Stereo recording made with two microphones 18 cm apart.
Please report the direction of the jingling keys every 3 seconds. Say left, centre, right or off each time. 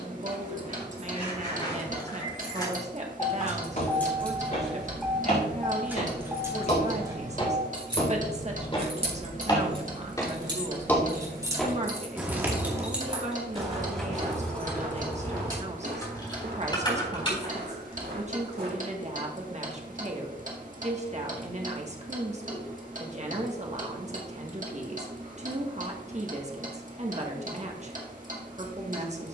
left, centre, right, right, centre, left, off, off, off, off.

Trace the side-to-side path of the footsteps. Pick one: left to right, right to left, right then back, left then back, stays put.
left to right.